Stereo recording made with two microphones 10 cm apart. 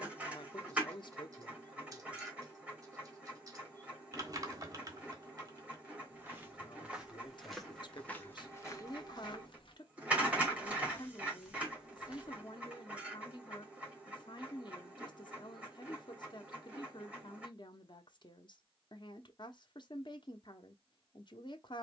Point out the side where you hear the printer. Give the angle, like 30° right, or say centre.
10° right.